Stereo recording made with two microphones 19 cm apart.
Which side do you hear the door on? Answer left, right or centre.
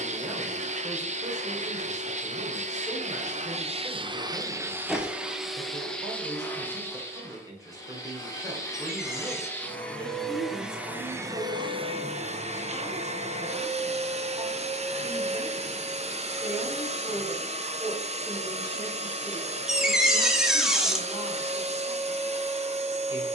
centre.